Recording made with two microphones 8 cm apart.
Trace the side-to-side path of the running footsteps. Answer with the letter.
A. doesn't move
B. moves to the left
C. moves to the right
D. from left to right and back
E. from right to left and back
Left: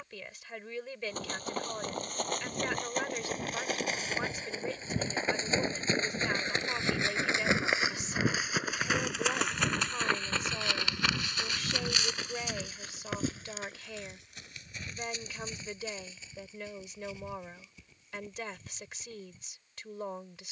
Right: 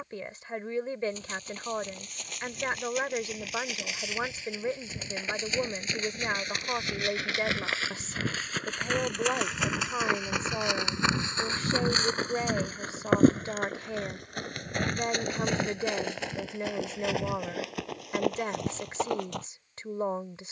C.